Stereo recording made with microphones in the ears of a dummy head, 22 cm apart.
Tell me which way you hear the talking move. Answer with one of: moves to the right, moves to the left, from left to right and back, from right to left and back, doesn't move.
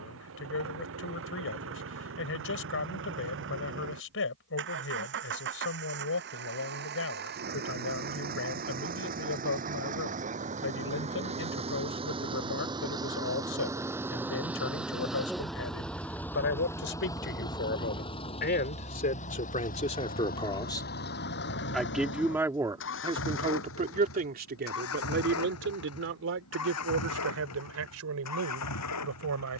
moves to the right.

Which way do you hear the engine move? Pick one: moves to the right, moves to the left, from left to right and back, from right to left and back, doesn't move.
moves to the left.